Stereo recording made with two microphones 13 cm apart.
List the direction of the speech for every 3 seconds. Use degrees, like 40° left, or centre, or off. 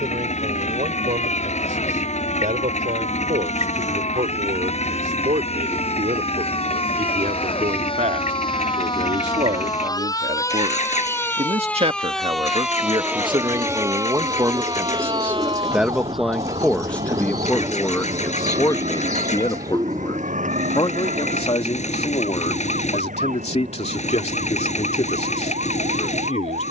80° right, 80° right, 70° right, 60° right, 40° right, 10° left, 40° left, 50° left, 60° left.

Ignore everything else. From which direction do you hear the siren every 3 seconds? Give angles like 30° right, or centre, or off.
60° left, 60° left, 50° left, 20° left, 20° right, 50° right, 70° right, 80° right, 80° right.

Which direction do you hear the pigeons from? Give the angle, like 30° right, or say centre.
30° right.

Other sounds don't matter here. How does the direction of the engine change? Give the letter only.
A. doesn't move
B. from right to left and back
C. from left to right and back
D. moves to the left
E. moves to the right
A.